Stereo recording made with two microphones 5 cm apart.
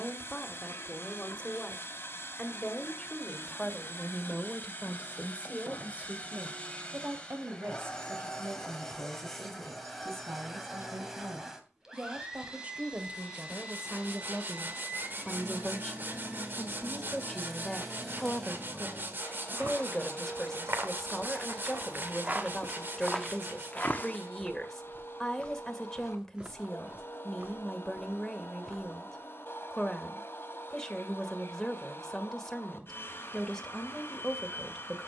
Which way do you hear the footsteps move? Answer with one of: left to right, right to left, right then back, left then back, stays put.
left then back.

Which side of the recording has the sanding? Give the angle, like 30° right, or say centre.
40° right.